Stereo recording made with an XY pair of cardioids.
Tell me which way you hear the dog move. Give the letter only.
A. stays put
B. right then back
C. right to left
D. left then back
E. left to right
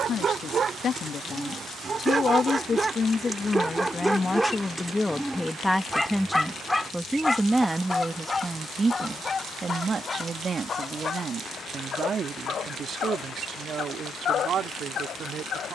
C.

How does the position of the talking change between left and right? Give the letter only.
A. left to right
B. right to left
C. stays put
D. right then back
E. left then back
A.